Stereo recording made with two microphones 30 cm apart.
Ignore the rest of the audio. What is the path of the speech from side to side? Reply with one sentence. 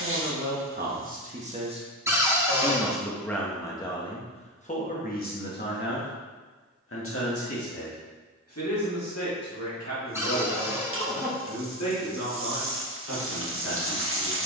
You can hear the speech travel towards the left.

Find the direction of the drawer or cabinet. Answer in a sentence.
In this clip you hear the drawer or cabinet in the centre.